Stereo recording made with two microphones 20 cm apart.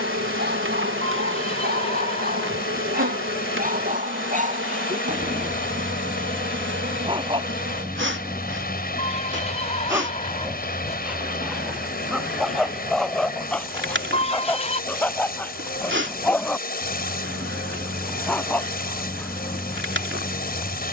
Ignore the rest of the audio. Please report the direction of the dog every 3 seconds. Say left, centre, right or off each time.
right, right, right, centre, centre, centre, centre.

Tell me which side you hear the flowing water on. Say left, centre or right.
left.